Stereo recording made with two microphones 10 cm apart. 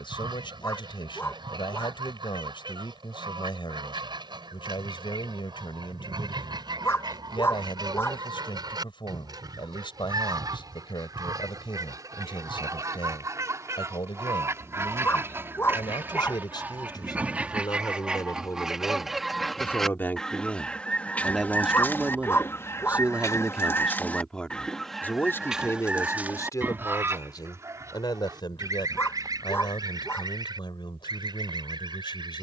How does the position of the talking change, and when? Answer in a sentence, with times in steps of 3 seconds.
In this clip you hear the talking on the left from 0 s, in the centre from 21 s and on the left from 24 s.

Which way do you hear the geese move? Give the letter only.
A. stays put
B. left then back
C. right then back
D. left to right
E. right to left
B.